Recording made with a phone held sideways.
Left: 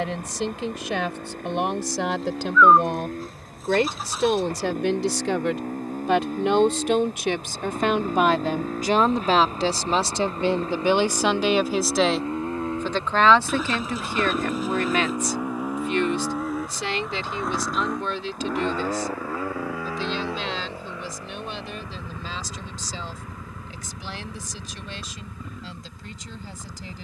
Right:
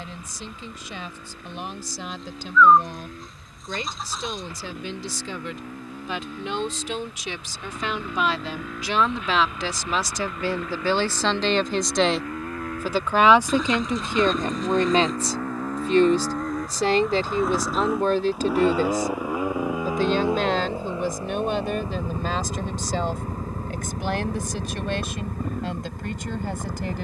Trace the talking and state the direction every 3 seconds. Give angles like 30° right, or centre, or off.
80° left, 70° left, 50° left, 20° left, 20° right, 40° right, 50° right, 60° right, 60° right.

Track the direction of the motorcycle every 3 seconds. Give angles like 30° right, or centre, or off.
50° left, 50° left, 40° left, 30° left, 20° left, centre, 20° right, 40° right, 50° right.